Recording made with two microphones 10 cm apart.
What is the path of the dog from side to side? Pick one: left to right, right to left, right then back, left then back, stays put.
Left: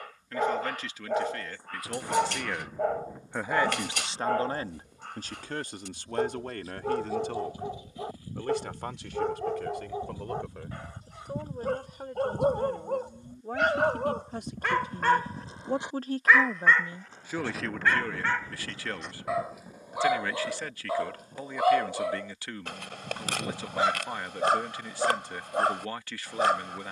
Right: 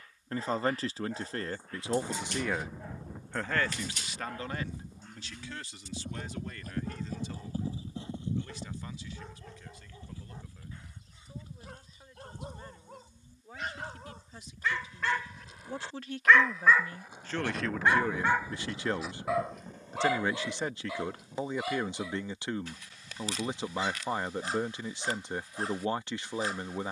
right then back.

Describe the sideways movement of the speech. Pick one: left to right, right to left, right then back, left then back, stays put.
left then back.